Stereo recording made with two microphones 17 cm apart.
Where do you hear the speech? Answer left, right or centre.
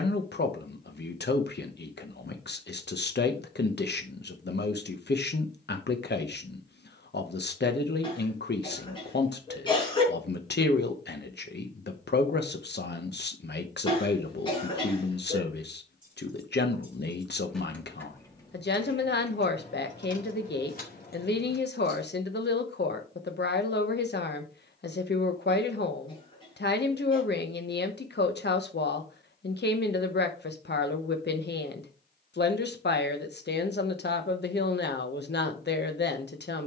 left.